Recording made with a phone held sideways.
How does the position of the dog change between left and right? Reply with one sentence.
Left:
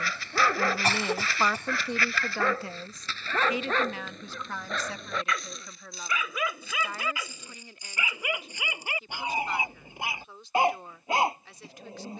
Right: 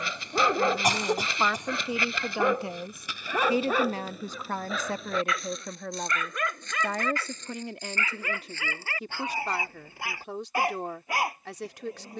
In this clip you hear the dog move to the left.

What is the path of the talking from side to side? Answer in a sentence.
You can hear the talking move to the right.